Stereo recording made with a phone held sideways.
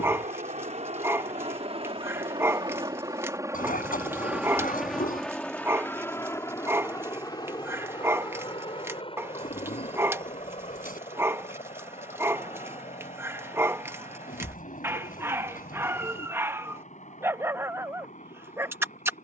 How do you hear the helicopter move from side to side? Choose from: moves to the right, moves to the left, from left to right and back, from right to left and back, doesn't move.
moves to the left.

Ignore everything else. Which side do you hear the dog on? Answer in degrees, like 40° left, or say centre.
20° right.